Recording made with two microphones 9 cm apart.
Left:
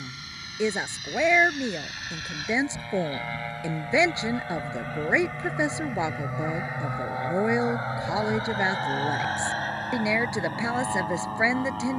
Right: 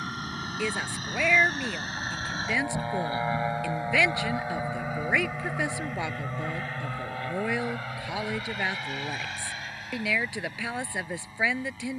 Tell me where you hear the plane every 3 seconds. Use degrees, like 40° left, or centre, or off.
40° right, 10° right, 20° left, 50° left.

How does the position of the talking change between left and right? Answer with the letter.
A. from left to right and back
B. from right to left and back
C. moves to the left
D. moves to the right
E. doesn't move
E.